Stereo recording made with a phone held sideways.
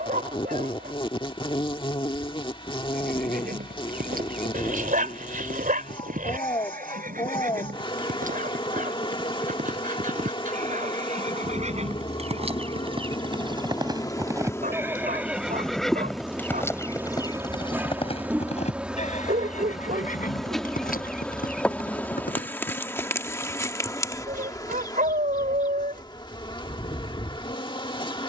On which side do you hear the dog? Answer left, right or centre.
right.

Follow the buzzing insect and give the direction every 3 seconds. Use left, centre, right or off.
left, left, left, left, left, centre, centre, centre, left, left.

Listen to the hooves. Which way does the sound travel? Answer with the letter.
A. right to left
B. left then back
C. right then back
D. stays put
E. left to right
A.